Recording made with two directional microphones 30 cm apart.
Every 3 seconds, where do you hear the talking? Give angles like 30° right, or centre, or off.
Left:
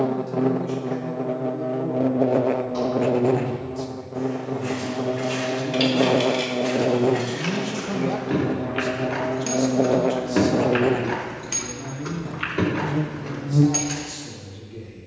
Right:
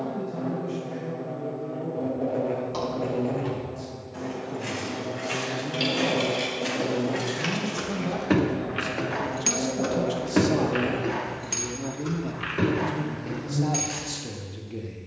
70° left, 50° left, 20° left, 10° right, 40° right.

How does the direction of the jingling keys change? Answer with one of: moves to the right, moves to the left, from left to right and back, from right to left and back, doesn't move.
from left to right and back.